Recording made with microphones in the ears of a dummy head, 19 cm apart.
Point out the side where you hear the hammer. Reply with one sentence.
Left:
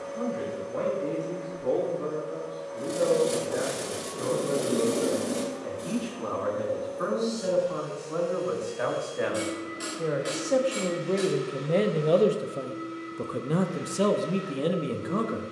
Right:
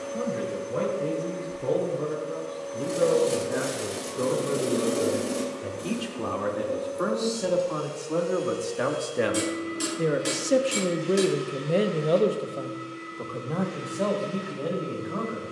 You can hear the hammer on the right.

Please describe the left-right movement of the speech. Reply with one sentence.
You can hear the speech travel towards the left.